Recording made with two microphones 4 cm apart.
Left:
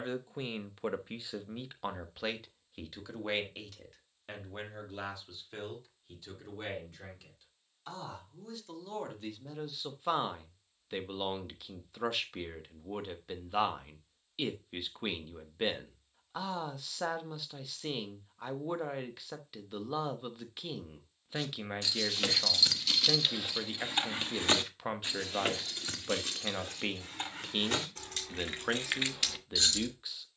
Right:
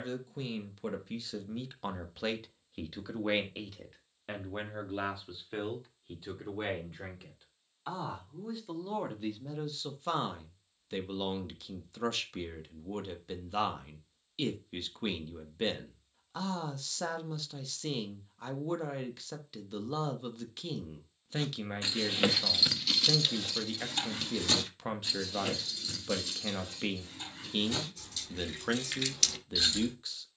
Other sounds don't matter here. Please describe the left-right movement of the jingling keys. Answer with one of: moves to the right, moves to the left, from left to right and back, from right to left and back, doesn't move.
from right to left and back.